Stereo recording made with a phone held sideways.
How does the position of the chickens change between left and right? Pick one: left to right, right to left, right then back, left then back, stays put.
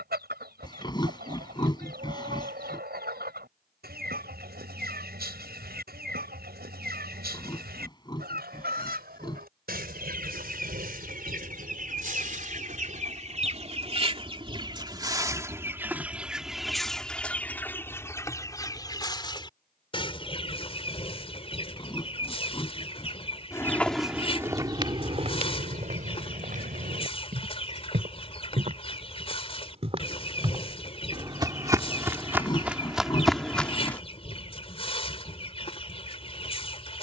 right to left.